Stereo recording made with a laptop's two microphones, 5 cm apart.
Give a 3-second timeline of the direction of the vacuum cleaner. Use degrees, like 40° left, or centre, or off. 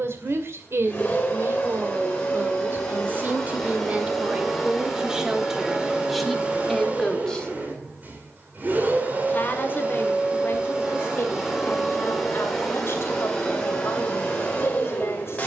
20° left, centre, 30° right, 20° right, 10° left.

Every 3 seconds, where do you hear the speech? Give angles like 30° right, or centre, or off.
50° right, 20° right, 10° left, 40° left, 50° left.